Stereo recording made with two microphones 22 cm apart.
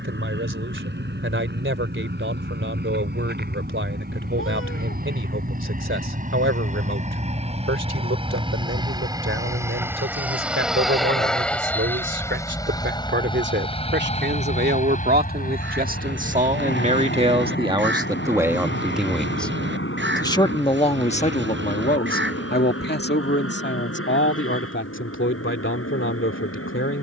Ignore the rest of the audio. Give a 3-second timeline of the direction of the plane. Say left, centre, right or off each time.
right, right, right, centre, left, left, left, left, left.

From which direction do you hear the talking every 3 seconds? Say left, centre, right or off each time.
right, right, right, right, right, right, centre, left, left.